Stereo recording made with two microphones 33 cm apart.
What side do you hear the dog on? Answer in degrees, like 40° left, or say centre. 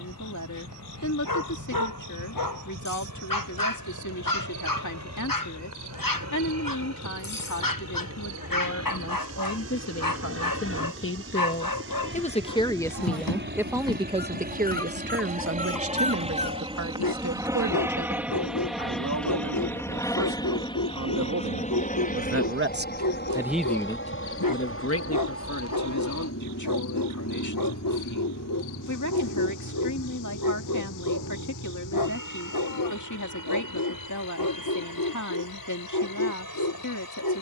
80° left.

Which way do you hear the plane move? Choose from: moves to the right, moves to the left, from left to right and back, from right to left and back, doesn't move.
moves to the left.